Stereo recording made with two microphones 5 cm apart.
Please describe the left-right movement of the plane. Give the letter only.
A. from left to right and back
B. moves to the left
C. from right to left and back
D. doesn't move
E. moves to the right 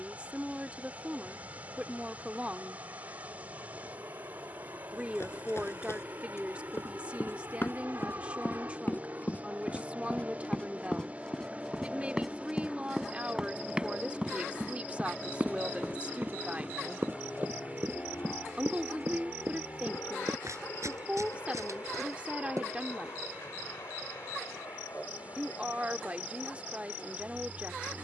B.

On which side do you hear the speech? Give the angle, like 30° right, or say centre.
20° right.